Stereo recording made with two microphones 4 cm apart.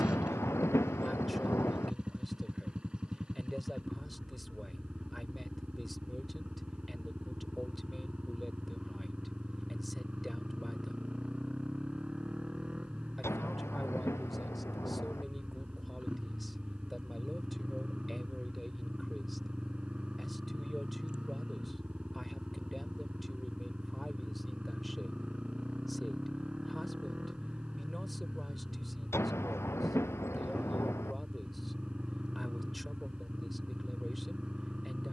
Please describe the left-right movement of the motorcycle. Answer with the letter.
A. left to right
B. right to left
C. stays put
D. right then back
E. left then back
C.